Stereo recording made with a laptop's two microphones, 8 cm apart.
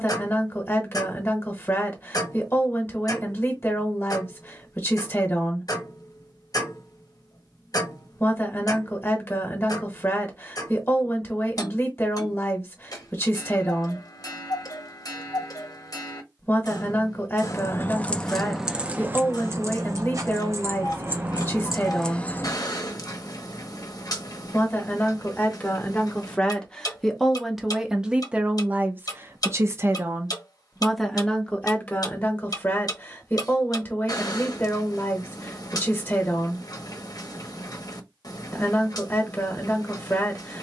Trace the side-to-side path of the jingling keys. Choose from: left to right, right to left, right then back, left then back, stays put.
right then back.